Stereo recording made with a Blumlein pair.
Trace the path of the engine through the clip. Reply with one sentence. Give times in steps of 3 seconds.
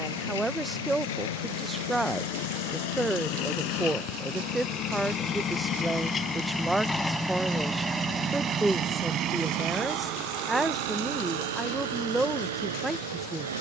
In this clip you hear the engine on the left from 0 s, in the centre from 6 s and on the right from 9 s.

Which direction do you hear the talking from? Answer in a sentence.
You can hear the talking in the centre.